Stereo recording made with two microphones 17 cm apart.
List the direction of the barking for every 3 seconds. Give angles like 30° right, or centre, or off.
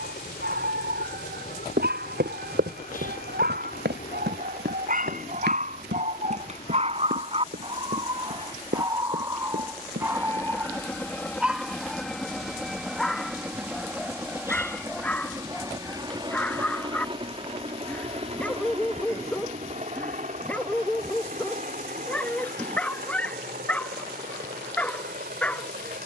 70° right, 60° right, 30° right, 10° right, centre, 10° left, 10° left, 10° left, 10° left.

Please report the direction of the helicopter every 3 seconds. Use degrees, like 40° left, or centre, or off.
60° left, 50° left, 30° left, 10° left, 10° right, 30° right, 40° right, 50° right, 50° right.